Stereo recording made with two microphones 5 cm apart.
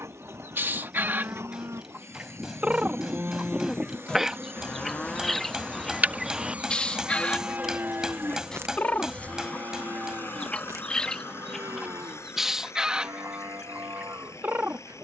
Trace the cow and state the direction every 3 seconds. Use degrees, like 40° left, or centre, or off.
70° right, centre, 30° right, 70° right, 70° right.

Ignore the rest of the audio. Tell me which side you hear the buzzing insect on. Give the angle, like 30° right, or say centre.
30° right.